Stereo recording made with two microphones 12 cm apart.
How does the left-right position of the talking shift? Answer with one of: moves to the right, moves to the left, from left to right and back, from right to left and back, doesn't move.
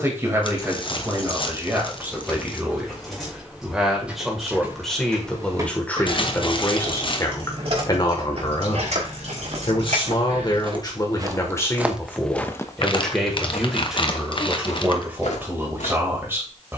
from right to left and back.